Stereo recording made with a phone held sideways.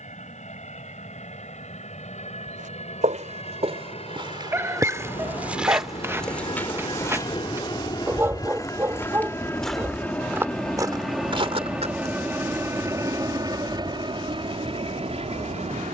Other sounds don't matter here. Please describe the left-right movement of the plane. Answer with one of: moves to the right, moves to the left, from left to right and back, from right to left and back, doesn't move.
moves to the right.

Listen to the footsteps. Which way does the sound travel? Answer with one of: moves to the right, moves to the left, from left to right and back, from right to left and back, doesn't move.
from right to left and back.